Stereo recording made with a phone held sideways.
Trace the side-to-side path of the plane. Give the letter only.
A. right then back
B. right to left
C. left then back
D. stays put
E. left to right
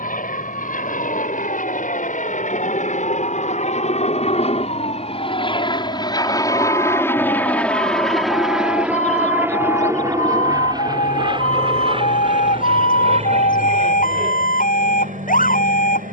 E.